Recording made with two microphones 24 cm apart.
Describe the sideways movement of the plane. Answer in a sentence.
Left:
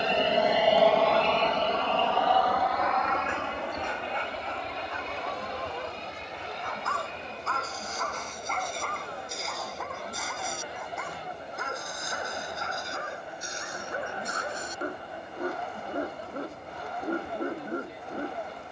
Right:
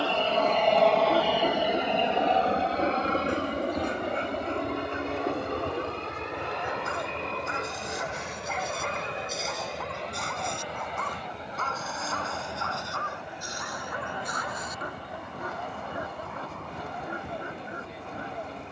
You can hear the plane go from the left side to the right.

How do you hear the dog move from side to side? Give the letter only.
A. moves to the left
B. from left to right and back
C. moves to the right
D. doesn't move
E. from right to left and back
A.